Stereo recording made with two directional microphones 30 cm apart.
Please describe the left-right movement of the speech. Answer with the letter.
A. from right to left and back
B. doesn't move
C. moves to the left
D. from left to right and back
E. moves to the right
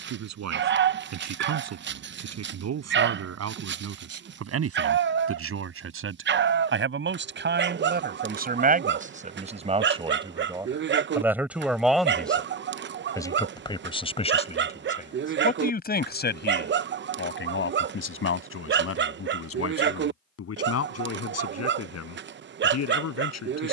C.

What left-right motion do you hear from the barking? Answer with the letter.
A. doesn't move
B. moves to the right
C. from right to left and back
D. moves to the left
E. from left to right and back
A.